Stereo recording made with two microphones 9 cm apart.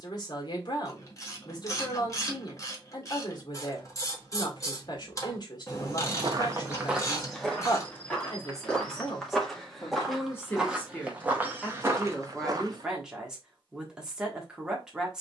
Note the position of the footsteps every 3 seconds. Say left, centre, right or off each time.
off, off, centre, centre, right.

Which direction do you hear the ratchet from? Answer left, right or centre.
left.